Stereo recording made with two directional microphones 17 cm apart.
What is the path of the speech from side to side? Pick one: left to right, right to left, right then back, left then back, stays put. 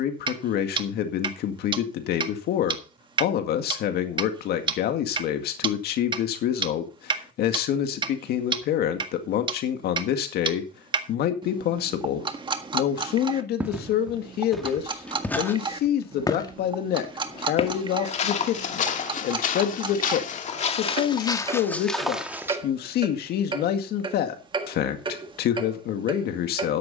stays put.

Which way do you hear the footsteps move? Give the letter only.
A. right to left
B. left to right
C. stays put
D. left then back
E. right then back
D.